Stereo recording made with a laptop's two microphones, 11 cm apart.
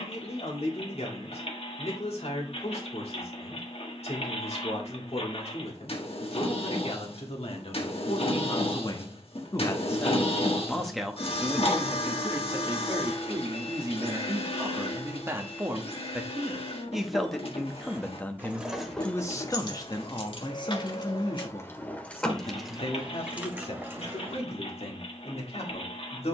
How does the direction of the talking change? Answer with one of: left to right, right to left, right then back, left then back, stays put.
right then back.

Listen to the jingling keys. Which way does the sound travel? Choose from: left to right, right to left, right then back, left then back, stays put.
left then back.